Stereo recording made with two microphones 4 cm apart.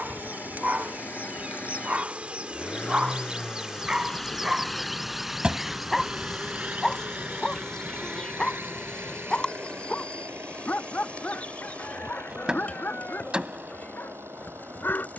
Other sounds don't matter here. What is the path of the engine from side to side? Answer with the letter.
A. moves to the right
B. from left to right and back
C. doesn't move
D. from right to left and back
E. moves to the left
A.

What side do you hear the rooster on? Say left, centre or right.
left.